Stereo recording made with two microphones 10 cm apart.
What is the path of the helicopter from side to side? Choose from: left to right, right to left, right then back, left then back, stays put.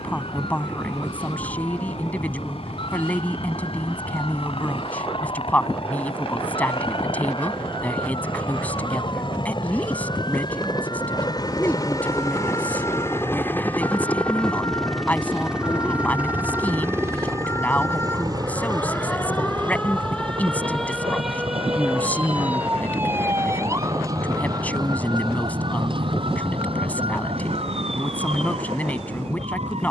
left to right.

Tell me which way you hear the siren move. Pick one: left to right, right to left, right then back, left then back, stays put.
left to right.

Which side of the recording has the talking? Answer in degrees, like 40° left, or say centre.
10° left.